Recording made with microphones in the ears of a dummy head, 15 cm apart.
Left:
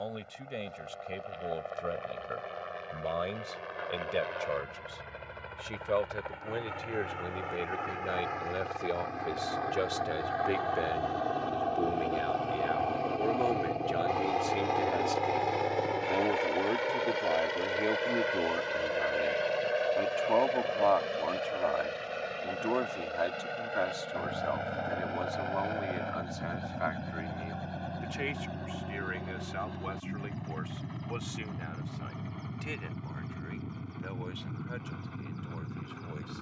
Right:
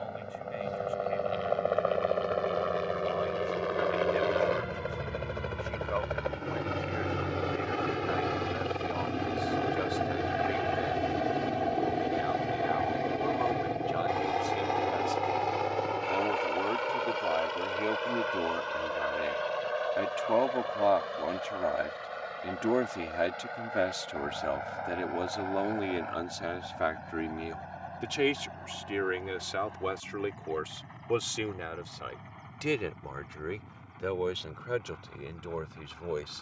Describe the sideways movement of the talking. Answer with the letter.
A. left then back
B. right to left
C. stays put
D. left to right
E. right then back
D.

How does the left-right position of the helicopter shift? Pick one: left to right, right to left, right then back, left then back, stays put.
right to left.